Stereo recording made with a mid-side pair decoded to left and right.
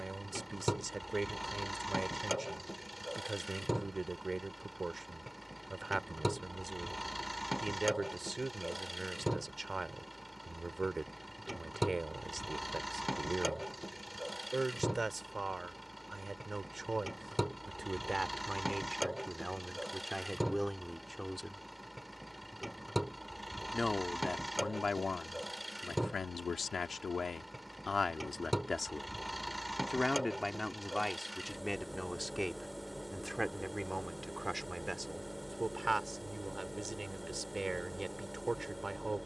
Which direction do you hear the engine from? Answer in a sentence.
In this clip you hear the engine in the centre.